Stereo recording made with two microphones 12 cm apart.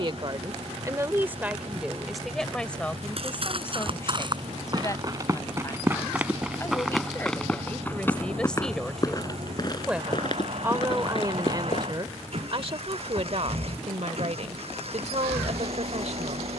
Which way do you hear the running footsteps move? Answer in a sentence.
In this clip you hear the running footsteps move from right to left.